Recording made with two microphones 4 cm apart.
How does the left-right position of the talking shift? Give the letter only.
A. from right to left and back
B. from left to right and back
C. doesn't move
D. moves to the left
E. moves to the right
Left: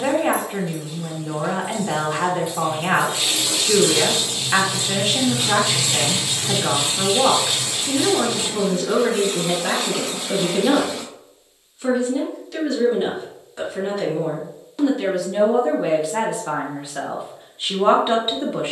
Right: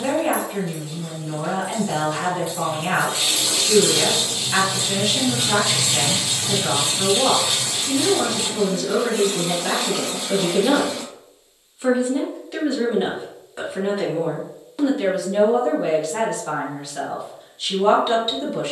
B.